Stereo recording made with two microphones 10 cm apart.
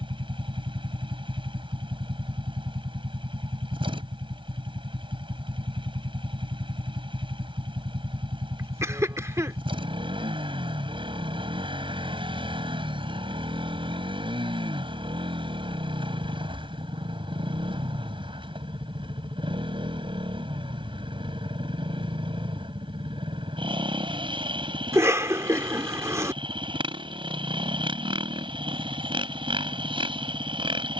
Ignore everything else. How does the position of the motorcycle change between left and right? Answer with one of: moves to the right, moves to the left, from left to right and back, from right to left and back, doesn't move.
doesn't move.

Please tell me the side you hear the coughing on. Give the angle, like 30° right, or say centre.
30° right.